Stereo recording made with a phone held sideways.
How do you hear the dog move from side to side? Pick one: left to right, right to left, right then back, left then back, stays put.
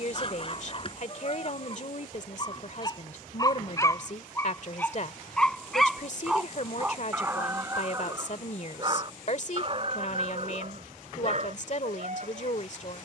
left to right.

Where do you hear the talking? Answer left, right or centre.
left.